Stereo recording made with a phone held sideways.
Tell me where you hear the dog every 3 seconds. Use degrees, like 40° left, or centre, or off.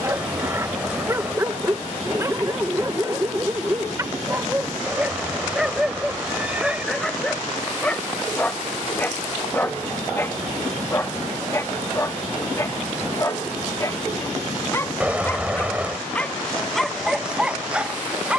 20° right, 10° right, 10° left, 20° left, 20° left, centre.